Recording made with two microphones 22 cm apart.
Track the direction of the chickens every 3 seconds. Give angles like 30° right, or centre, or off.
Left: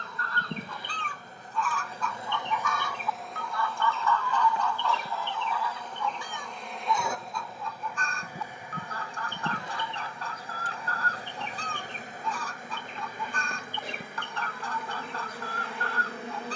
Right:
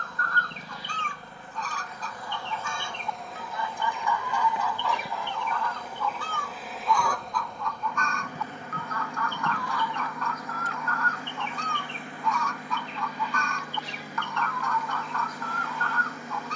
40° right, 10° right, 30° left, 30° left, 30° left, 30° left.